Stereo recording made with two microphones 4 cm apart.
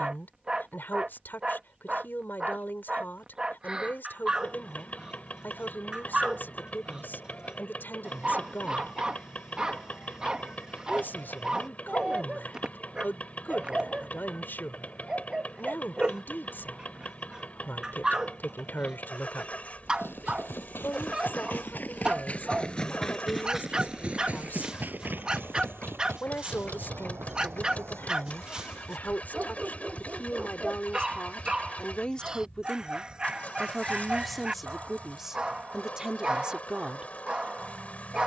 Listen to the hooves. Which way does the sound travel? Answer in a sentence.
In this clip you hear the hooves move from left to right.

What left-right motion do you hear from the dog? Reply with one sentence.
In this clip you hear the dog stay in one place.